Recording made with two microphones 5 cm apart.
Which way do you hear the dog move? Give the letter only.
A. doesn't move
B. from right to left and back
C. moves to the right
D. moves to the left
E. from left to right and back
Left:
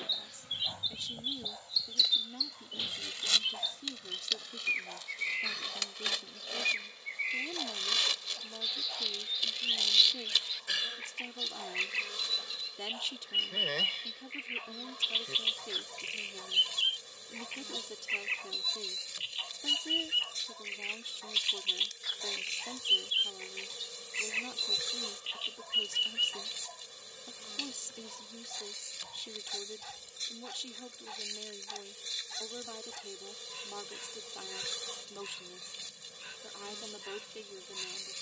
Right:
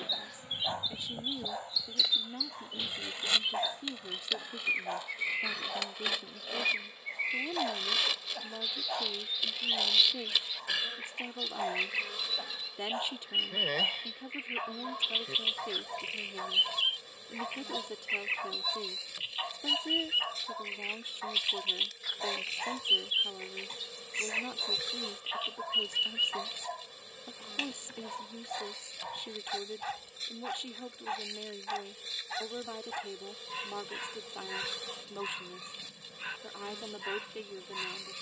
A.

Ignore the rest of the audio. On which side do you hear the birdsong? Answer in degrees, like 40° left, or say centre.
centre.